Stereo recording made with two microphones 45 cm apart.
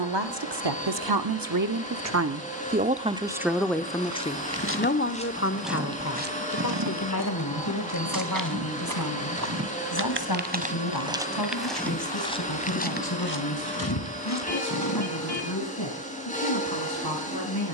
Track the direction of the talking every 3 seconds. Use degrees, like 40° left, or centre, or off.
50° right, 10° left, 40° left, 50° left, 60° left, 60° left.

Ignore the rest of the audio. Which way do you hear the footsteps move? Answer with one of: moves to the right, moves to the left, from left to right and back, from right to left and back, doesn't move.
from left to right and back.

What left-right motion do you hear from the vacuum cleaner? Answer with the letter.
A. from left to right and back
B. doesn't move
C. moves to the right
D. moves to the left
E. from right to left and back
B.